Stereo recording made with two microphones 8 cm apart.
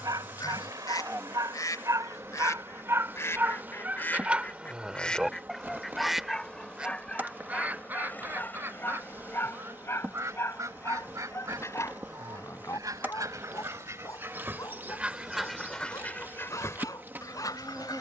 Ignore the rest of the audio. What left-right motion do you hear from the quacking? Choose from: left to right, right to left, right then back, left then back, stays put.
right then back.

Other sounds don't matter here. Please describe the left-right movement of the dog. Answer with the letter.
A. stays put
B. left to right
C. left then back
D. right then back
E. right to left
E.